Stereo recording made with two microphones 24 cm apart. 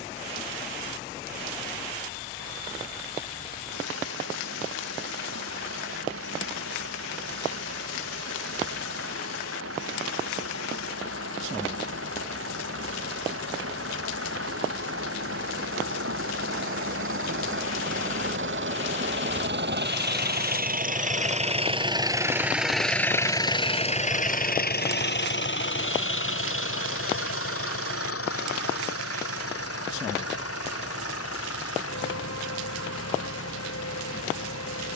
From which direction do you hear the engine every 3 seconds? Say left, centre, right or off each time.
right, right, right, right, right, right, right, centre, left, left, left, left.